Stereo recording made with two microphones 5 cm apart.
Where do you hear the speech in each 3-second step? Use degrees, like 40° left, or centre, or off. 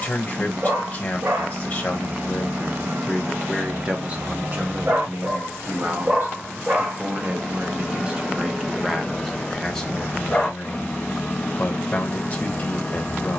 30° left, 30° right, 30° right, 20° left, 30° left.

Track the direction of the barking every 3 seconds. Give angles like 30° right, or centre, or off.
60° right, 50° right, 20° right, 20° left, 20° left.